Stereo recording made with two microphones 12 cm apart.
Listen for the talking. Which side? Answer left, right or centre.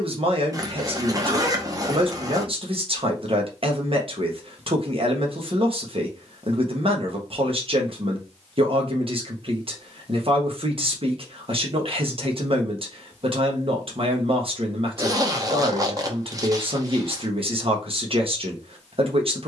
right.